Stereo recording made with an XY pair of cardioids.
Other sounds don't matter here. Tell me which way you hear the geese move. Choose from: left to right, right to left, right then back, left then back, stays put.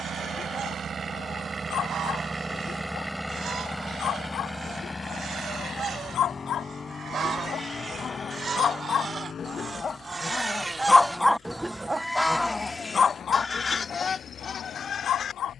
right to left.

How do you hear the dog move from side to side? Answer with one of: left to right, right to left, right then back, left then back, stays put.
right then back.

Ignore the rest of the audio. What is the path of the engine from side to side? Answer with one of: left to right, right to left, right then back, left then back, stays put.
right to left.